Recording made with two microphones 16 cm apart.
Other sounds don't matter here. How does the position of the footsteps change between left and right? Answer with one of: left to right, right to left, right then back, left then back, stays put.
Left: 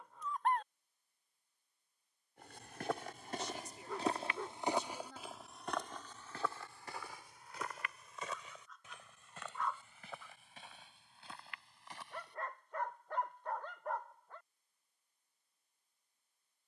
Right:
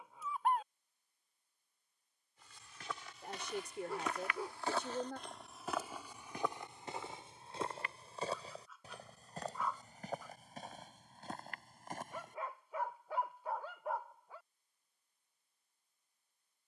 left to right.